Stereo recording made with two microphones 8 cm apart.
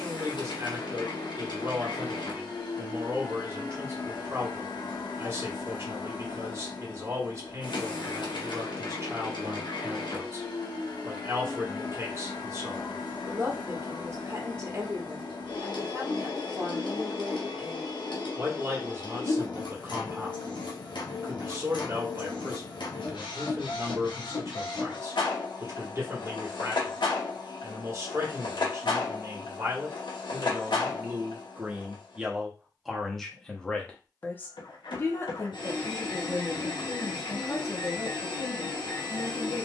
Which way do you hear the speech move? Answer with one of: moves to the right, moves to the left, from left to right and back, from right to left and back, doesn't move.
moves to the left.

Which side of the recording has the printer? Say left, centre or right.
left.